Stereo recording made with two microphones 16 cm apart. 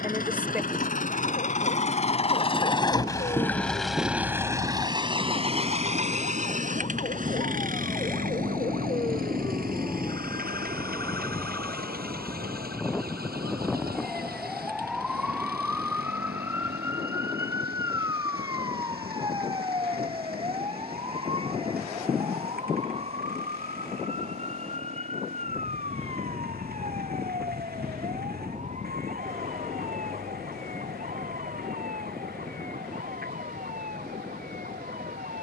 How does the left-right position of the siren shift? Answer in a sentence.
You can hear the siren travel towards the right.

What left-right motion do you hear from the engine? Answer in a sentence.
In this clip you hear the engine move from left to right.